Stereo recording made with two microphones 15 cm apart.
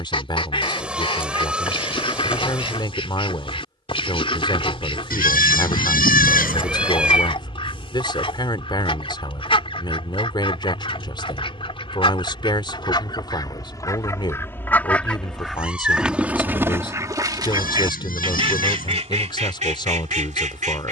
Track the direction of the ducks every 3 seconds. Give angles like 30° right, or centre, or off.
40° left, 40° left, 40° left, 40° left, 30° left, 10° right, 50° right.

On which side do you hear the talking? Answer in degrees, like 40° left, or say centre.
30° left.